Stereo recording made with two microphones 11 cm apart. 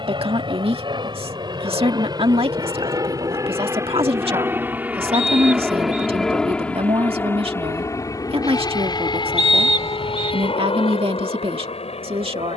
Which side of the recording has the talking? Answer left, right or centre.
right.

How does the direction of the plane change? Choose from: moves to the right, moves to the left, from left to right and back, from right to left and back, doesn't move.
moves to the left.